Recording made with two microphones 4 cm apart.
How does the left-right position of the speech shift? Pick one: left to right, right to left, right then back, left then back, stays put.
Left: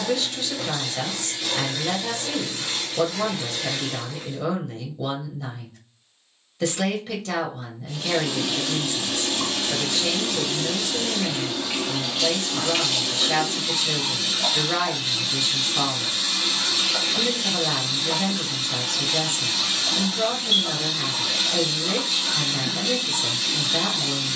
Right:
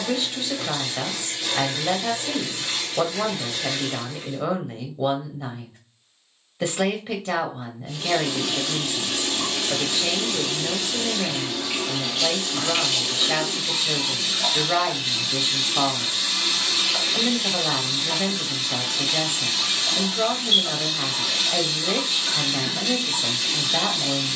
stays put.